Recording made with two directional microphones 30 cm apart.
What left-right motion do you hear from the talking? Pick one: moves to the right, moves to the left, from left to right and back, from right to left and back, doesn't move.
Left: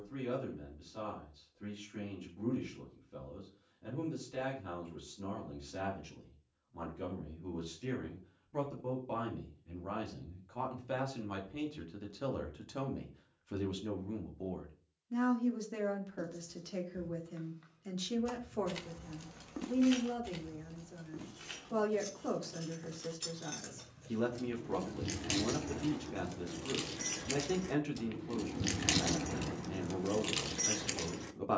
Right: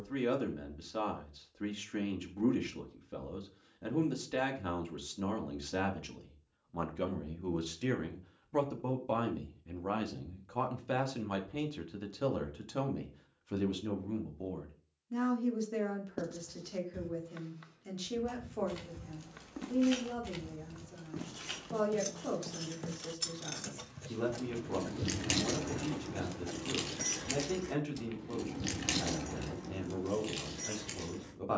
moves to the left.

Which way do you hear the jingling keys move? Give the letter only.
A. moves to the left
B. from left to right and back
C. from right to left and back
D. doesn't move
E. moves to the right
B.